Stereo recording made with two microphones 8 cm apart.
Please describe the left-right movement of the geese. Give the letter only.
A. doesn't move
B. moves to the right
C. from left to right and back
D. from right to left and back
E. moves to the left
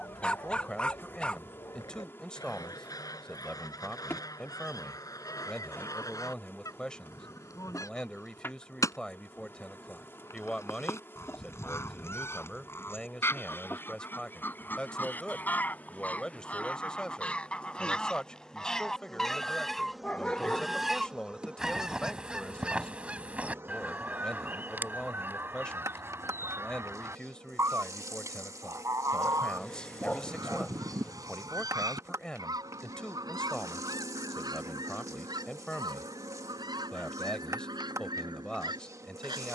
B.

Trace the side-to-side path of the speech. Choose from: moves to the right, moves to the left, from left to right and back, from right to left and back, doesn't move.
doesn't move.